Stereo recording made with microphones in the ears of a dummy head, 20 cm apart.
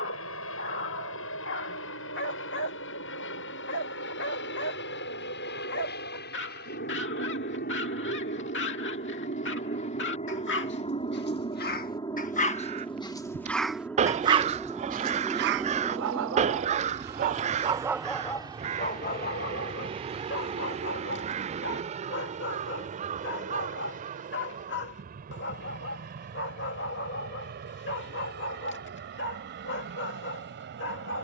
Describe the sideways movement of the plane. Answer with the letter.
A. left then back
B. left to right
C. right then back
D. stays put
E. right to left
B.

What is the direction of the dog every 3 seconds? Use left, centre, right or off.
left, left, left, left, centre, right, left, left, left, left, left.